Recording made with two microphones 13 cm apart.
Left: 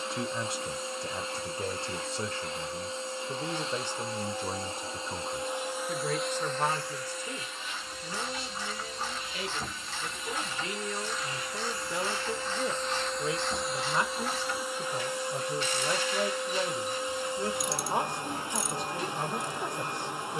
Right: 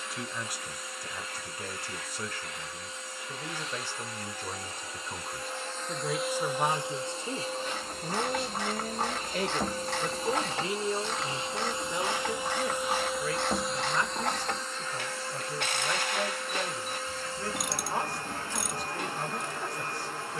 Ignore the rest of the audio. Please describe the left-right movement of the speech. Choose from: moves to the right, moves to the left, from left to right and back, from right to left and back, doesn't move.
from left to right and back.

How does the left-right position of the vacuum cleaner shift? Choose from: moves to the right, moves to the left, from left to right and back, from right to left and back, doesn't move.
from left to right and back.